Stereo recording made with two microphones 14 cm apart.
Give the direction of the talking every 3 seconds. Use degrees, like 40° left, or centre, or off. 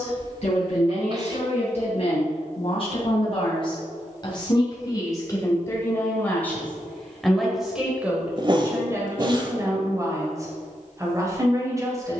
50° left, 30° left, centre, 20° right.